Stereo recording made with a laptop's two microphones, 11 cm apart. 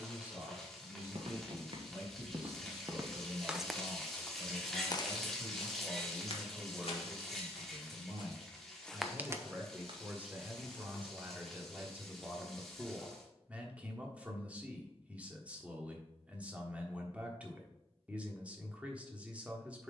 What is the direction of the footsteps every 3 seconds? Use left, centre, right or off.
right, left, left, right, off, off, off.